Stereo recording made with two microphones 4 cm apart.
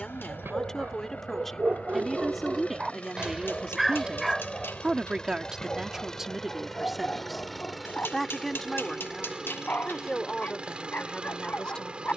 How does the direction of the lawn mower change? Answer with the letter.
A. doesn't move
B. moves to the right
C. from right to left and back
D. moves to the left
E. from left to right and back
B.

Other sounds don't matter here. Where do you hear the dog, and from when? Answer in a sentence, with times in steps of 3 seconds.
You can hear the dog on the right from 0 s, in the centre from 3 s and on the left from 6 s.